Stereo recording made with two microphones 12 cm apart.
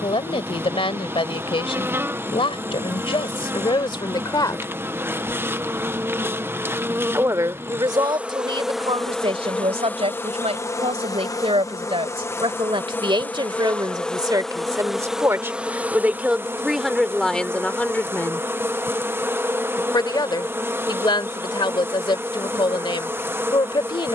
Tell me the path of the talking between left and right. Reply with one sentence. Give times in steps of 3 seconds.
In this clip you hear the talking on the left from 0 s, on the right from 6 s, in the centre from 15 s and on the left from 18 s.